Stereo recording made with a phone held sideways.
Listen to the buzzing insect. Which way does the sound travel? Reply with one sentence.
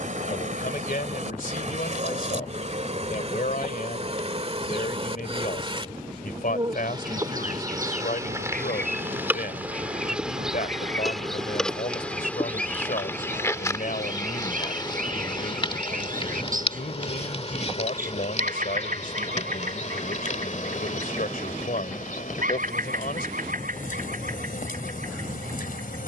You can hear the buzzing insect travel towards the left.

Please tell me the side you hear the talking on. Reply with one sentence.
In this clip you hear the talking on the left.